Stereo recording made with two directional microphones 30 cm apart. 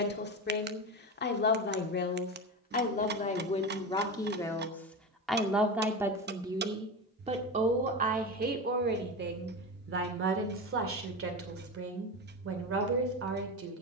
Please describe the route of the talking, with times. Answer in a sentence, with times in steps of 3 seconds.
In this clip you hear the talking on the left from 0 s, in the centre from 3 s and on the right from 6 s.